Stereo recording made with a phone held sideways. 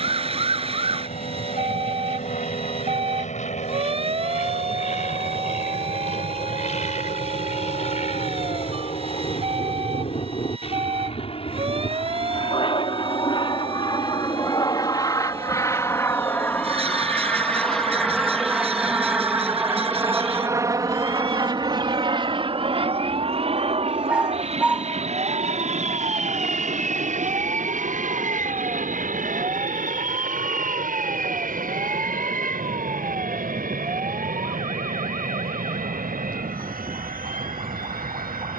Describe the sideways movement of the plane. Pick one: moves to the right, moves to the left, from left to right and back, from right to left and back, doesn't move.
moves to the right.